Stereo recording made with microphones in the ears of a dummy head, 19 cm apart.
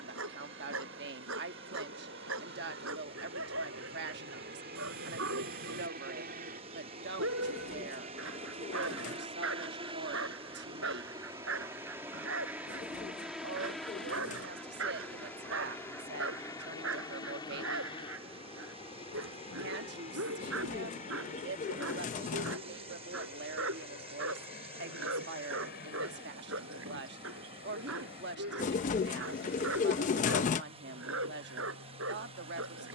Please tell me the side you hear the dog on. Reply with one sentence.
In this clip you hear the dog on the right.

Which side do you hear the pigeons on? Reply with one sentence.
You can hear the pigeons on the left.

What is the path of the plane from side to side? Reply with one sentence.
You can hear the plane travel towards the left.